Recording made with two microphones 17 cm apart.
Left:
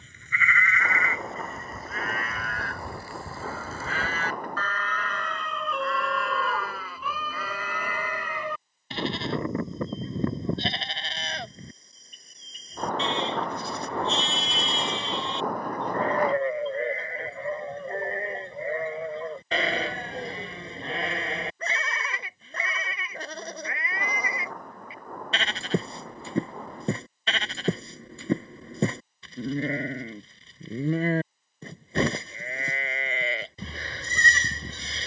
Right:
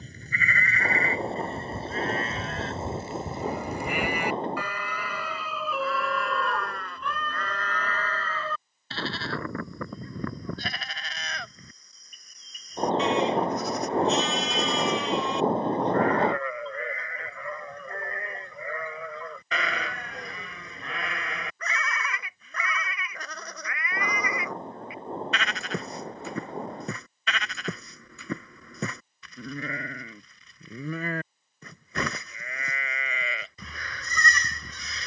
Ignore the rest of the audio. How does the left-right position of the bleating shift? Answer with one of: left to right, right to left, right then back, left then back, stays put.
right to left.